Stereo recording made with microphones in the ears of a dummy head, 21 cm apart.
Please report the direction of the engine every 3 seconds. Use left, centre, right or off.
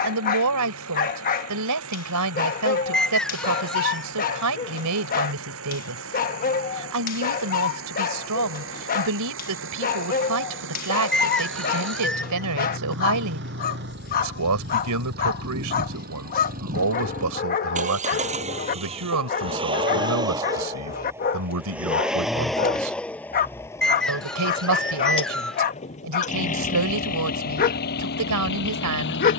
right, right, right, right, right, right, right, centre, left, left.